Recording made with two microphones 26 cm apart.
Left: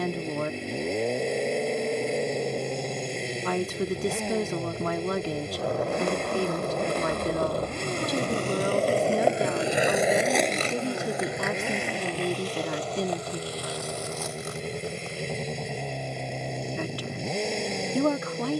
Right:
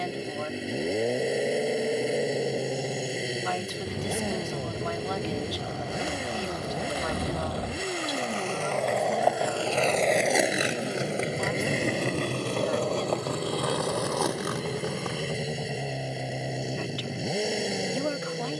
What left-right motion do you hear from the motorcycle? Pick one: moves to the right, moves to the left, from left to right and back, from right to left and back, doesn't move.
doesn't move.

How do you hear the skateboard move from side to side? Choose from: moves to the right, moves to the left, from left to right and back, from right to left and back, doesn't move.
moves to the right.